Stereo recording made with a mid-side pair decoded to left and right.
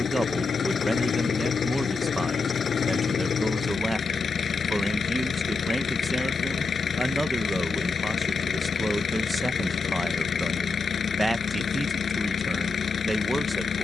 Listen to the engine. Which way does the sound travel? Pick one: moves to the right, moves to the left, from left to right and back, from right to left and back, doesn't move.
doesn't move.